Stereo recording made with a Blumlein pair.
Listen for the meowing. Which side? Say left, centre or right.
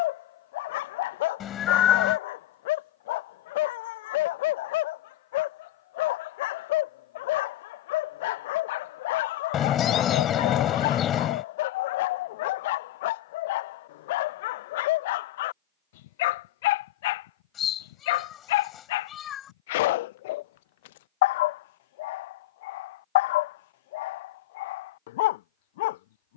left.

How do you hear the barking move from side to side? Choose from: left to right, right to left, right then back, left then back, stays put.
stays put.